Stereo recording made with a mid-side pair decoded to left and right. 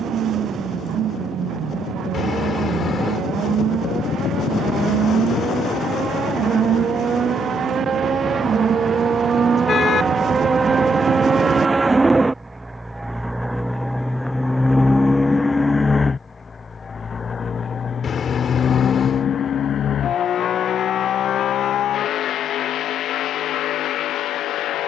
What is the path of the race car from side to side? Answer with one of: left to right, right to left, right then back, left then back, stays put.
right to left.